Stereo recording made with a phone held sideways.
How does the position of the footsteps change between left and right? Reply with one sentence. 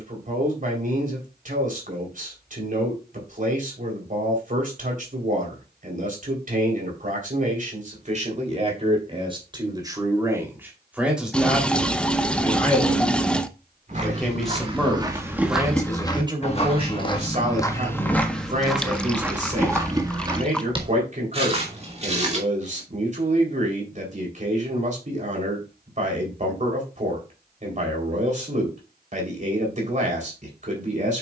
In this clip you hear the footsteps go left and come back.